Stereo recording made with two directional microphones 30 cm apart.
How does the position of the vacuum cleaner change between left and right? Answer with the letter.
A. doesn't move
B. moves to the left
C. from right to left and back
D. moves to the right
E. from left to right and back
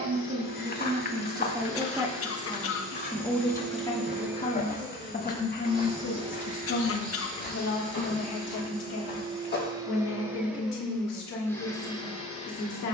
E.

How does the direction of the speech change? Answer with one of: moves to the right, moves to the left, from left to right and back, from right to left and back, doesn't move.
moves to the left.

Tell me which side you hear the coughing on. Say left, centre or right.
left.